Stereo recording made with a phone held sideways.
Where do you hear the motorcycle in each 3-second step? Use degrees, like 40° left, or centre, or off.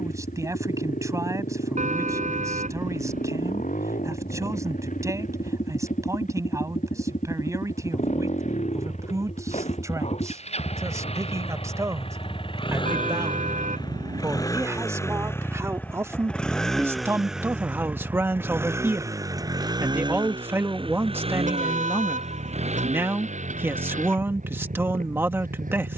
70° left, 60° left, 60° left, 50° left, 30° left, 10° left, 20° right, 50° right, 60° right.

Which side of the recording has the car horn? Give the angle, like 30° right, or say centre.
60° right.